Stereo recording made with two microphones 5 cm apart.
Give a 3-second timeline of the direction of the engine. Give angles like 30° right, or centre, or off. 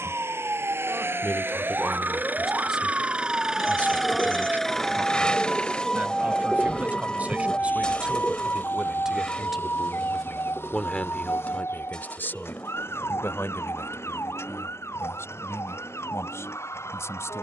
50° right, centre, 40° left, 50° left, 60° left, 60° left.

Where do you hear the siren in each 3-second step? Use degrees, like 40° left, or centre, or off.
40° right, 10° right, 30° left, 50° left, 70° left, 70° left.